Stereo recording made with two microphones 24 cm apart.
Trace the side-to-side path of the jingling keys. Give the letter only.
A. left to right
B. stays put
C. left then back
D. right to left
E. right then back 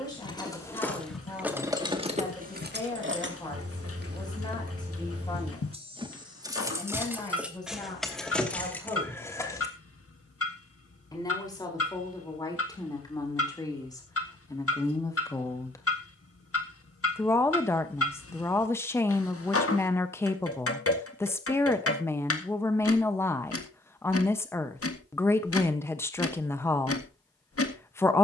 E.